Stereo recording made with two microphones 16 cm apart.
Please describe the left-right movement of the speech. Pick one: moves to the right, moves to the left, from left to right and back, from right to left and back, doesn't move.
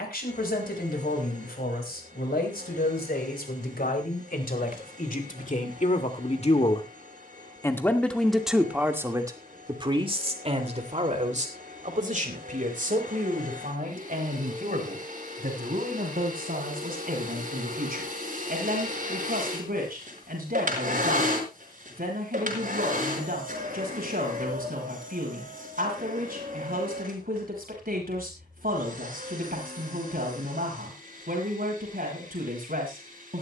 moves to the right.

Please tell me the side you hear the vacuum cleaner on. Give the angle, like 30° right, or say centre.
60° right.